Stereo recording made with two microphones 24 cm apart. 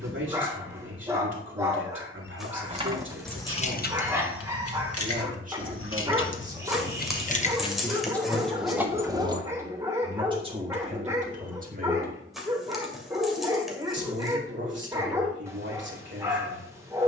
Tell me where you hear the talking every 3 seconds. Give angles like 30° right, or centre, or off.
50° right, 40° right, centre, 20° right, 50° right, 50° right.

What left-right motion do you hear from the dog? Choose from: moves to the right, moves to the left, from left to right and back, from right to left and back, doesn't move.
doesn't move.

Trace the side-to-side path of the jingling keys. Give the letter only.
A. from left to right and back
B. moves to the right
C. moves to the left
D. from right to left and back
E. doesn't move
D.